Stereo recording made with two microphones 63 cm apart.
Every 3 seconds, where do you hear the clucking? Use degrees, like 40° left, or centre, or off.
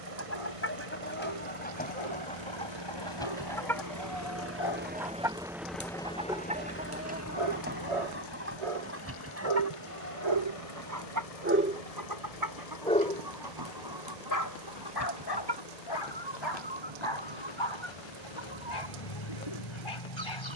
10° left, centre, 10° right, 20° right, 30° right, 40° right, 40° right.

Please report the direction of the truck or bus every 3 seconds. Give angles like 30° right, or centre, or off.
50° right, 20° right, 30° left, 50° left, 60° left, 70° left, 70° left.